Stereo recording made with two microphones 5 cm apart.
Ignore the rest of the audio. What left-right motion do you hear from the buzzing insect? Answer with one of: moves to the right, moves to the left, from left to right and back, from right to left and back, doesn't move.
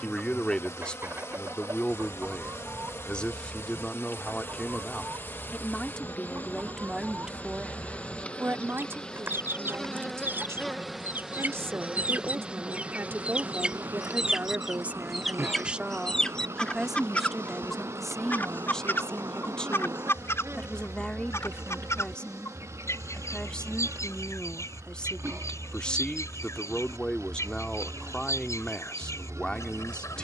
moves to the right.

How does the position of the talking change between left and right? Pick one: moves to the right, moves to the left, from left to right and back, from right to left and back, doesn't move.
from left to right and back.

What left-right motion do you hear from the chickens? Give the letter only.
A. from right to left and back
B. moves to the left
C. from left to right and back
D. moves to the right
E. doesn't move
B.